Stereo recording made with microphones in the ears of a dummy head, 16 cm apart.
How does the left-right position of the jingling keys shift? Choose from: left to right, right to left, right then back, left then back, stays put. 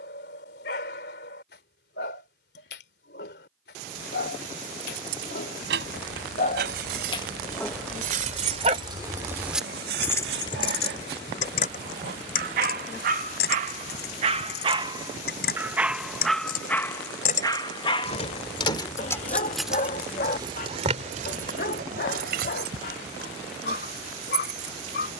left then back.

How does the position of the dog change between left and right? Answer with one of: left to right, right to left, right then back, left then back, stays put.
right then back.